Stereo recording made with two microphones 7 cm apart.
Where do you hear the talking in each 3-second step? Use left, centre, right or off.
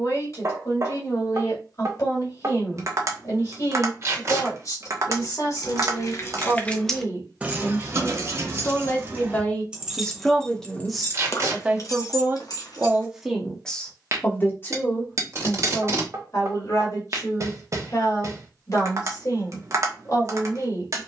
left, left, left, centre, centre, left, left.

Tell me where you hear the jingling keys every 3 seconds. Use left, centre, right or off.
off, left, centre, centre, left, off, off.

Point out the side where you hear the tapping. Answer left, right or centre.
right.